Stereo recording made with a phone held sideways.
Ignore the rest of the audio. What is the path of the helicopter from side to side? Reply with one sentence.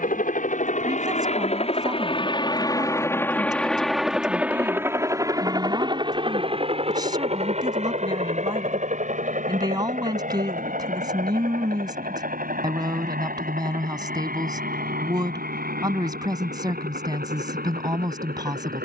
In this clip you hear the helicopter travel towards the right.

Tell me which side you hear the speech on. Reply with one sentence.
In this clip you hear the speech on the right.